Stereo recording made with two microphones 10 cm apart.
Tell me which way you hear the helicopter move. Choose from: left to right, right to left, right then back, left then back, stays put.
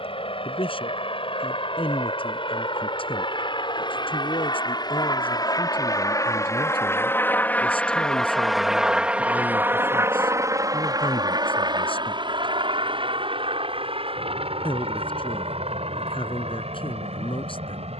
left to right.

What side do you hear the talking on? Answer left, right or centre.
left.